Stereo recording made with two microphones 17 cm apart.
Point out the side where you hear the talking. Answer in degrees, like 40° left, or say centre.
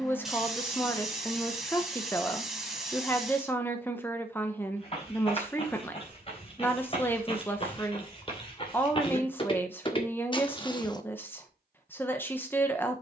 10° left.